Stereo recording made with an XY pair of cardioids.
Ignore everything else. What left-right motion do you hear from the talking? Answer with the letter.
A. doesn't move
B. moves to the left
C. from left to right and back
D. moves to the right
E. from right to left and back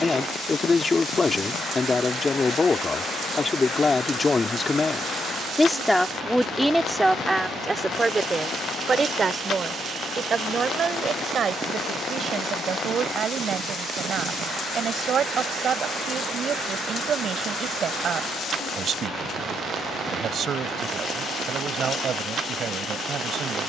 D.